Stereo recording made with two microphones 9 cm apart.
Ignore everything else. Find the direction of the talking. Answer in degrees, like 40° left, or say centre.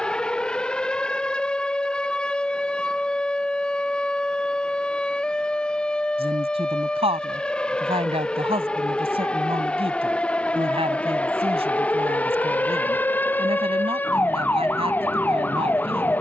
70° right.